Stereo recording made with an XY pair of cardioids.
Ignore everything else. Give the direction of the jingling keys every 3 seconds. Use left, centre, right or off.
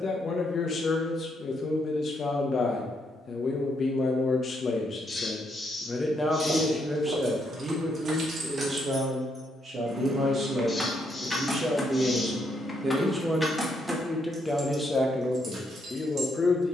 off, off, right, centre, centre, right.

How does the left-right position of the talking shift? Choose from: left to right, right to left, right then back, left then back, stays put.
right then back.